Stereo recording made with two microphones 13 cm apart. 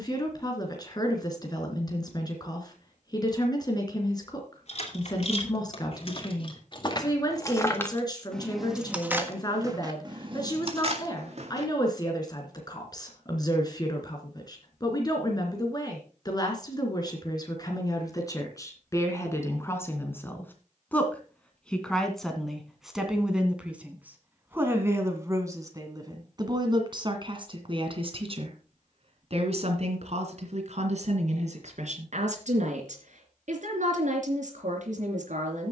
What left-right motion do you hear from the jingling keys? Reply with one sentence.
You can hear the jingling keys move from left to right.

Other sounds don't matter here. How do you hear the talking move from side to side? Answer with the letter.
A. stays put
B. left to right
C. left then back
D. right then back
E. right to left
B.